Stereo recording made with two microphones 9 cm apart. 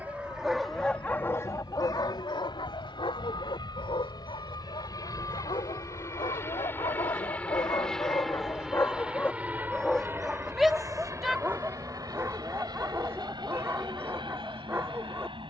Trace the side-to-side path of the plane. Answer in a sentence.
In this clip you hear the plane move to the right.